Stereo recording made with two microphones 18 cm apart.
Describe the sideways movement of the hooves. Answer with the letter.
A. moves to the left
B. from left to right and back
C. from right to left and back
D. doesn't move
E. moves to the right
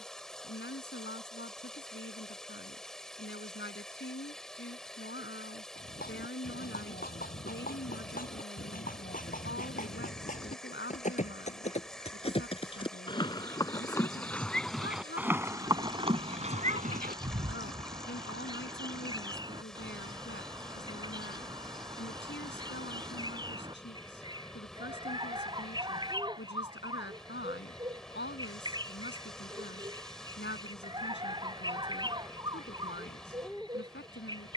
E.